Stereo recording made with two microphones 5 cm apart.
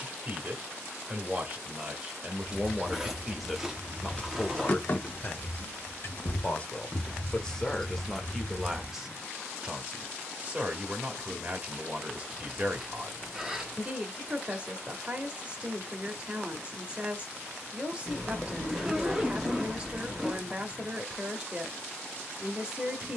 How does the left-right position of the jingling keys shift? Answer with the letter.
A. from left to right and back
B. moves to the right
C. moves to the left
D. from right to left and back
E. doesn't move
D.